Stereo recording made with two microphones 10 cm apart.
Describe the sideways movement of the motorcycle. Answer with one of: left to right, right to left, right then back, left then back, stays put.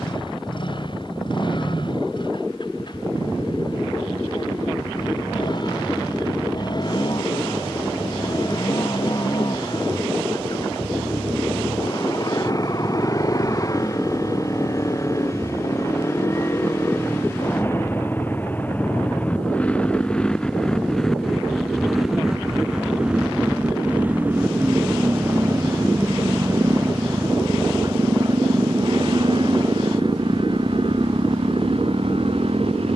left to right.